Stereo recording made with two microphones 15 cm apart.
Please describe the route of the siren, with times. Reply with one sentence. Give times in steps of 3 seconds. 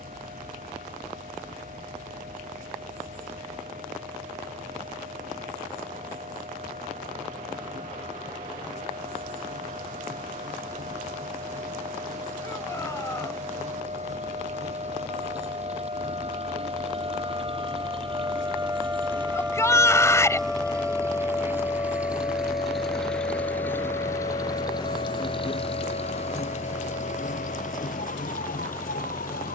In this clip you hear the siren on the right from 0 s, in the centre from 18 s and on the left from 21 s.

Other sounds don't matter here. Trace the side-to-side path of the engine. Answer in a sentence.
In this clip you hear the engine move from right to left.